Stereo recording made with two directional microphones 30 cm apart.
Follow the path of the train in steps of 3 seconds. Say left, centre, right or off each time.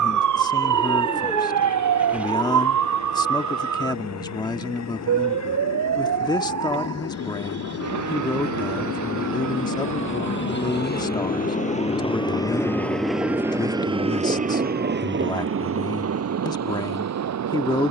left, left, left, left, centre, right.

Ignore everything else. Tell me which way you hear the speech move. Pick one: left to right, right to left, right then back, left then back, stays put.
stays put.